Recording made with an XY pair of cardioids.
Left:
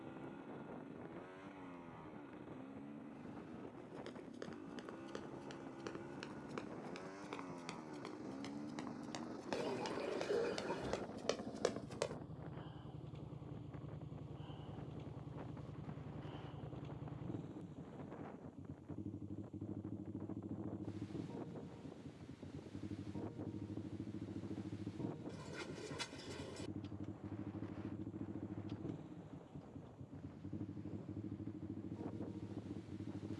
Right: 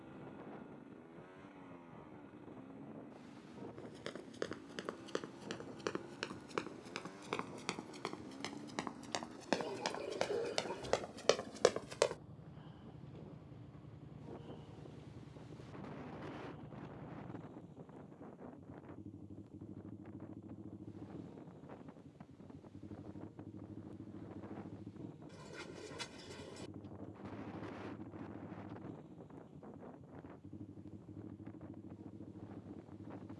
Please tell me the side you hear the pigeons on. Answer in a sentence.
In this clip you hear the pigeons in the centre.